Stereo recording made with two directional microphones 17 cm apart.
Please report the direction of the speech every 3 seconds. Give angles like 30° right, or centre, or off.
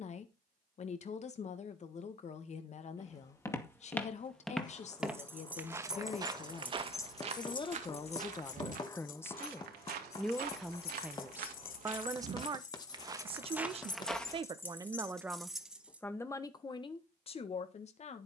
40° left, 40° left, 30° left, centre, 30° right, 20° left.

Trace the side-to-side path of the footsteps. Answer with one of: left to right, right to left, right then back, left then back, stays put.
right then back.